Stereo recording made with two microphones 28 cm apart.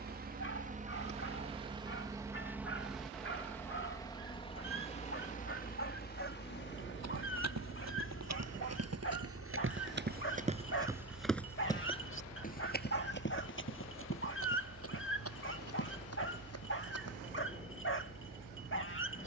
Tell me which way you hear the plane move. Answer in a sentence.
You can hear the plane move to the left.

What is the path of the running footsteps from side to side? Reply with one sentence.
In this clip you hear the running footsteps move from right to left.